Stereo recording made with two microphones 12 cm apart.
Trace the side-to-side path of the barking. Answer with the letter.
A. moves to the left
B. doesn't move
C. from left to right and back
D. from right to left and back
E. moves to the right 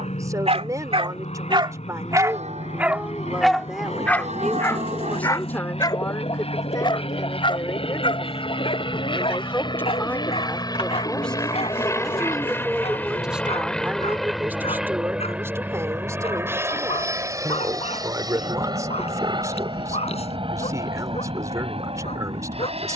A.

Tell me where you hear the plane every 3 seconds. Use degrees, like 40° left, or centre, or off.
70° left, 60° left, 50° left, 30° left, 10° left, 20° right, 40° right, 50° right.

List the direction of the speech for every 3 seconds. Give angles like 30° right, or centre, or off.
20° right, centre, 30° left, 10° left, 10° right, 20° right, 20° right, 20° right.